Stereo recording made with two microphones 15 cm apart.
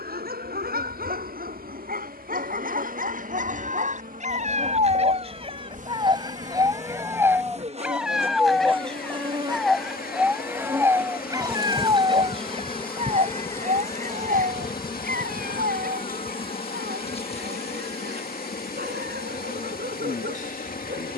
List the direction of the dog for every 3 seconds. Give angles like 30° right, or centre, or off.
70° right, 50° right, 10° right, 10° right, 50° right, 70° right, 80° right.